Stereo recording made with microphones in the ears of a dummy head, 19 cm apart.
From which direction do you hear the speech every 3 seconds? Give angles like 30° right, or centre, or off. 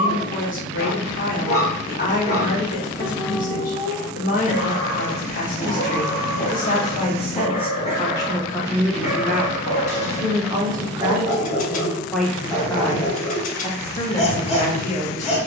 40° left, 40° left, 20° left, 10° right, 20° left.